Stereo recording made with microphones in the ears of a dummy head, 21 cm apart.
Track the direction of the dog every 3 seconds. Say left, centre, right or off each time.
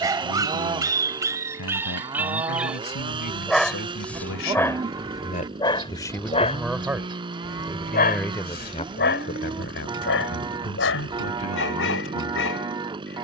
centre, centre, left, left, left.